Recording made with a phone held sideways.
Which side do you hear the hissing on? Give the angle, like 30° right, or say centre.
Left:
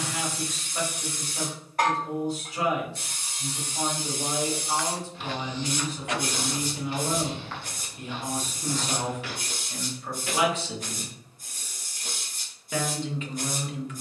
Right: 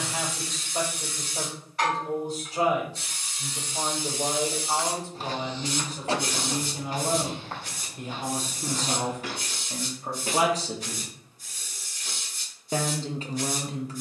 50° left.